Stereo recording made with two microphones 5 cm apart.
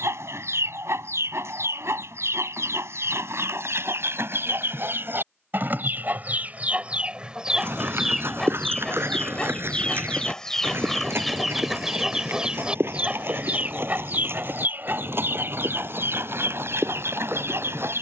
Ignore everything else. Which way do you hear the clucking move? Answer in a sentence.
In this clip you hear the clucking go left and come back.